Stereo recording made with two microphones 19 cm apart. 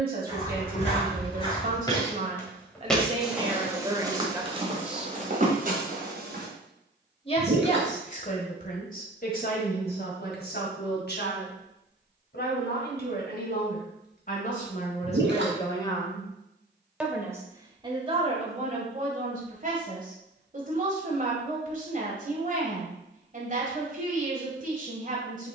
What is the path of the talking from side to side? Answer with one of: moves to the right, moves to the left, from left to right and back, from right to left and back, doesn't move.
from right to left and back.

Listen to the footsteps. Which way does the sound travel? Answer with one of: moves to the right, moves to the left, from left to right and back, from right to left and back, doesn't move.
moves to the right.